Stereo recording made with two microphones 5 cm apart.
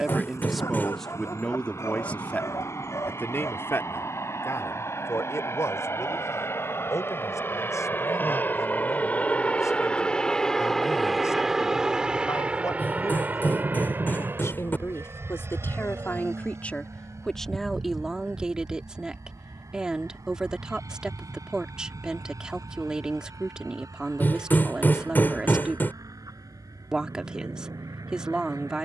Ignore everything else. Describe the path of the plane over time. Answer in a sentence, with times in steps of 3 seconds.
You can hear the plane on the left from 0 s, in the centre from 9 s and on the right from 12 s.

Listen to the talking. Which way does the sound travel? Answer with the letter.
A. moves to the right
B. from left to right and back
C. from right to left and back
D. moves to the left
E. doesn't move
C.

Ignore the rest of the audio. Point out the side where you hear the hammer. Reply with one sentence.
In this clip you hear the hammer on the left.